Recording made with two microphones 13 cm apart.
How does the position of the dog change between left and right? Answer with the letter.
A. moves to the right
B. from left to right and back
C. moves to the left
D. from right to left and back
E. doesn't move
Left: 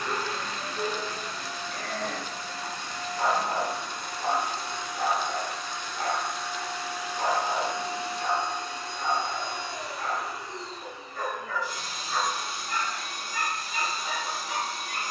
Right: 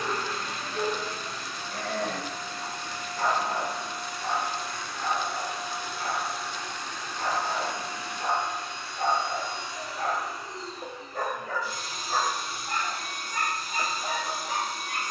D.